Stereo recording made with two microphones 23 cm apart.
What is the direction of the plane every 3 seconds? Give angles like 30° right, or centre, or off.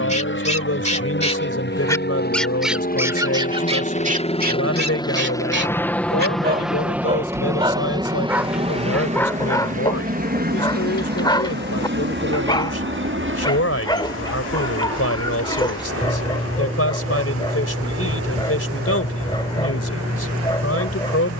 50° left, 20° left, 10° right, 40° right, 50° right, 60° right, 60° right.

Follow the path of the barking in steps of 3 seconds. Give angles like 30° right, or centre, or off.
20° left, 30° right, 20° right, 20° left, 20° left, 20° left, 20° left.